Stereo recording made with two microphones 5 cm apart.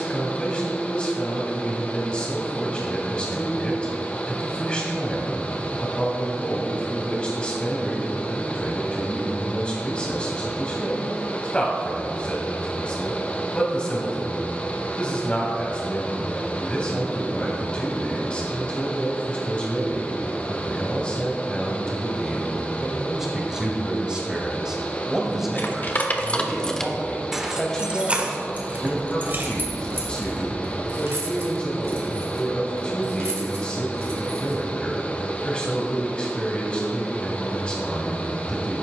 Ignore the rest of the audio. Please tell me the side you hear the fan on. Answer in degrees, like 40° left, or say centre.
30° left.